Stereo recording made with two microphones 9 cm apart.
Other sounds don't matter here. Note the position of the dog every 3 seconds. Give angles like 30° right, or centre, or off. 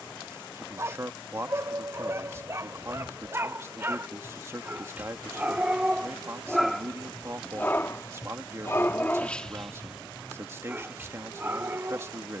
30° right, 20° right, 20° left, 10° right.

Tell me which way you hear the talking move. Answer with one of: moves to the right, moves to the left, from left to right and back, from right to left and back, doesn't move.
doesn't move.